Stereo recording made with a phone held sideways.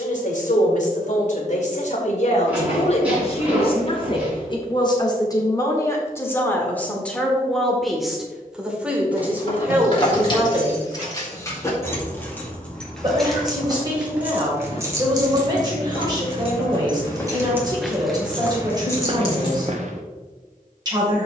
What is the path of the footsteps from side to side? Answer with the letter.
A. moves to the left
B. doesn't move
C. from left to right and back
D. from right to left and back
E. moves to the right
D.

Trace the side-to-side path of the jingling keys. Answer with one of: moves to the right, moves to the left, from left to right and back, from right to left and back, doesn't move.
from left to right and back.